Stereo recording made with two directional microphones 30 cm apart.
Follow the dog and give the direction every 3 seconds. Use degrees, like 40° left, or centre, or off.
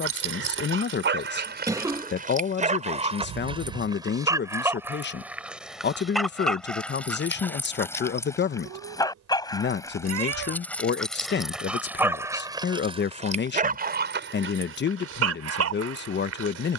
40° right, 10° right, 10° left, 10° left, 30° right, 60° right.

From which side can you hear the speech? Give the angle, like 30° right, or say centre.
40° left.